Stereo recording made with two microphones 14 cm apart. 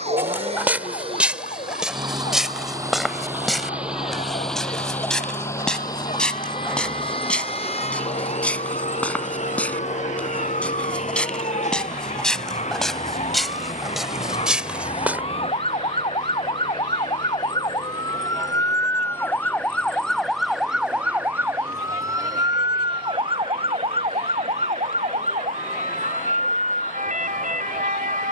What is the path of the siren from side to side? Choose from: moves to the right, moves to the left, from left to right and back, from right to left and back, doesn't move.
moves to the right.